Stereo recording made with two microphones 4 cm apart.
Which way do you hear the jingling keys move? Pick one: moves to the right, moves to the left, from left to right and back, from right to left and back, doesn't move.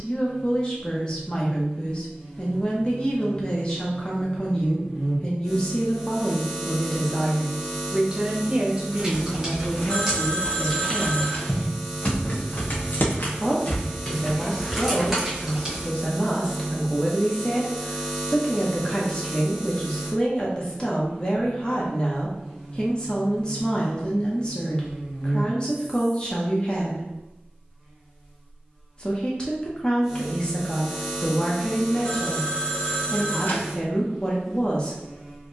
from right to left and back.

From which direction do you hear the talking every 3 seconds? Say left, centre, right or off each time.
left, left, centre, centre, left, left, left, left, left, left, left, left.